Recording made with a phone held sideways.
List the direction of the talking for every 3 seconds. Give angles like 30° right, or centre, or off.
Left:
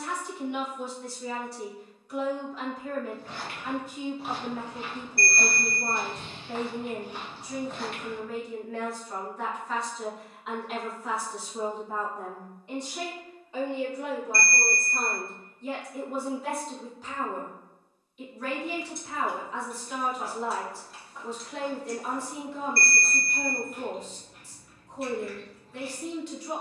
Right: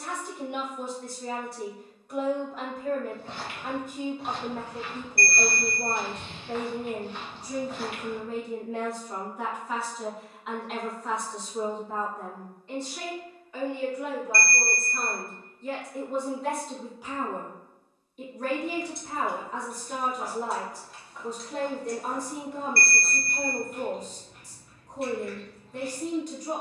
50° right, 50° right, 30° right, centre, 20° left, centre, 40° right, 40° right, 40° right.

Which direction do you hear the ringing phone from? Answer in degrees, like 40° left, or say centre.
60° right.